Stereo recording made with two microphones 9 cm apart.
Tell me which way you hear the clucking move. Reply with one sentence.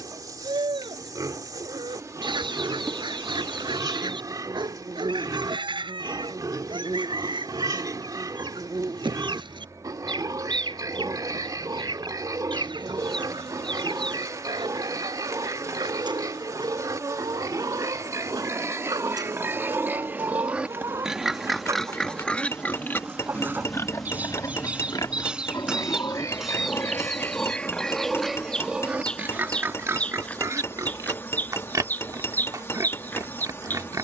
In this clip you hear the clucking go from the right side to the left.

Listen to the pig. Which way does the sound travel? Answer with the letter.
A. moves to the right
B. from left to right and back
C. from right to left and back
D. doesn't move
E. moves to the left
C.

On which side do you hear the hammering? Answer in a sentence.
In this clip you hear the hammering on the left.